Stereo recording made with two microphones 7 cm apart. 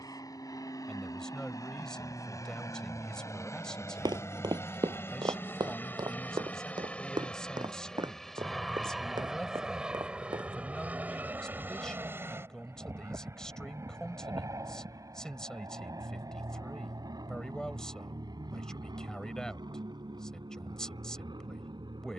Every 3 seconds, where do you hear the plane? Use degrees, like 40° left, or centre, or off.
50° left, 30° left, 10° left, 20° right, 40° right, 50° right, 60° right, 60° right.